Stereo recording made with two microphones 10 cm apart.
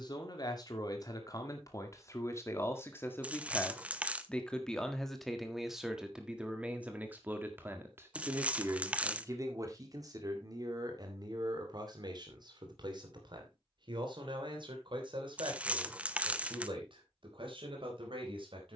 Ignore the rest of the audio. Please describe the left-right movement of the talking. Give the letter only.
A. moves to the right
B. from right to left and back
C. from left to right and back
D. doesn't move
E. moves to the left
A.